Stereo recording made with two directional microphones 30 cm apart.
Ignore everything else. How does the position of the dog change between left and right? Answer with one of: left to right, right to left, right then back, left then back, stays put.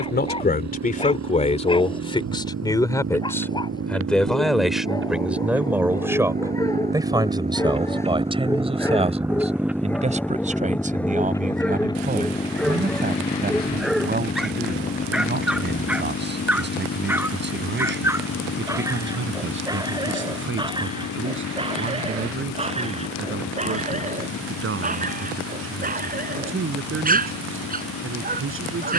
left to right.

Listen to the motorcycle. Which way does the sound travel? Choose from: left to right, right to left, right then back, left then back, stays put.
right to left.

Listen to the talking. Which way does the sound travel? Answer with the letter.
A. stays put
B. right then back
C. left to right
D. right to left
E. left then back
C.